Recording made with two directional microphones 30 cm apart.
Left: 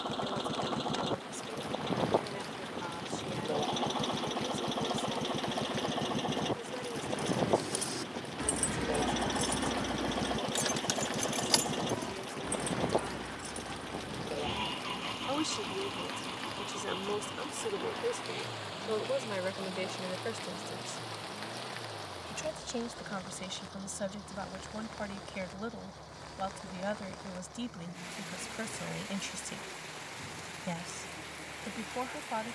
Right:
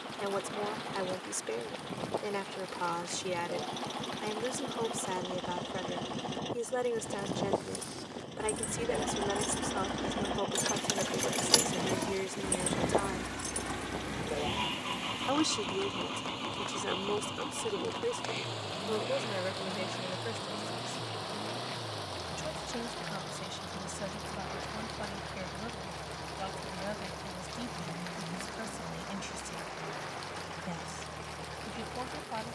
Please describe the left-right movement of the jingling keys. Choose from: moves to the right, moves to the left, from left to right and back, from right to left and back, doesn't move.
moves to the right.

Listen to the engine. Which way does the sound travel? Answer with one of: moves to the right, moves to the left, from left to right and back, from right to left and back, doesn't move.
moves to the right.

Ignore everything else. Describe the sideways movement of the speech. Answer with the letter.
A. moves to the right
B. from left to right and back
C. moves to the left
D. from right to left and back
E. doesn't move
C.